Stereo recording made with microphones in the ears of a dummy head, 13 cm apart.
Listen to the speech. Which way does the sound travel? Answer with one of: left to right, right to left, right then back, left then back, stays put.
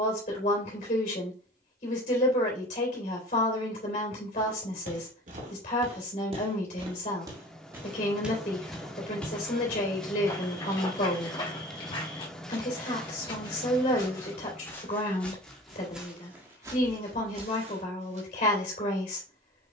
stays put.